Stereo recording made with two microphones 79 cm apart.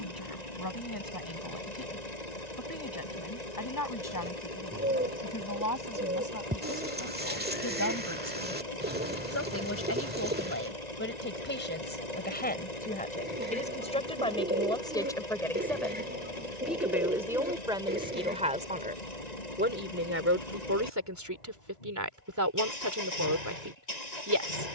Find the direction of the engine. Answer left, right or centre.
left.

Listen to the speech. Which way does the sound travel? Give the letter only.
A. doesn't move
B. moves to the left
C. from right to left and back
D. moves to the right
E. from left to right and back
D.